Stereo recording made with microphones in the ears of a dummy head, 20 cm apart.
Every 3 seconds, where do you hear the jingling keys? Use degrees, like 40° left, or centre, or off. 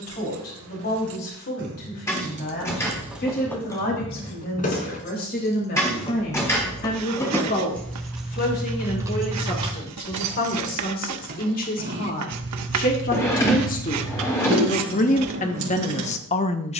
50° right, 20° left, 10° left, 30° right, 60° right, 70° right.